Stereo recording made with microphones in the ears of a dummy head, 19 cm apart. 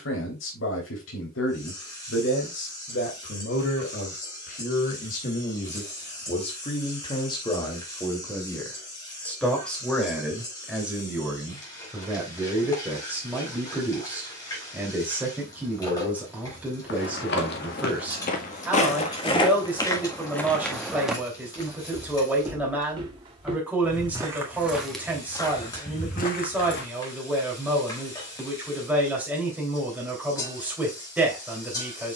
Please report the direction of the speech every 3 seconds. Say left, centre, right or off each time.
left, left, left, centre, centre, centre, centre, centre, centre, centre, centre.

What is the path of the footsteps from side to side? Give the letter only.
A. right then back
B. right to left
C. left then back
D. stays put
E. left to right
A.